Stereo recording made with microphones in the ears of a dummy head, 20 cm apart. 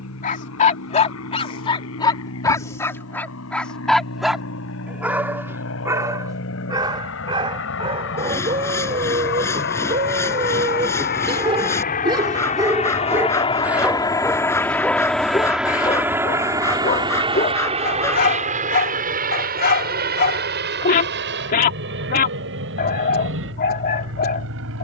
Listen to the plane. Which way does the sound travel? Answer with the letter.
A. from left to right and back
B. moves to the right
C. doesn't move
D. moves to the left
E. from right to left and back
B.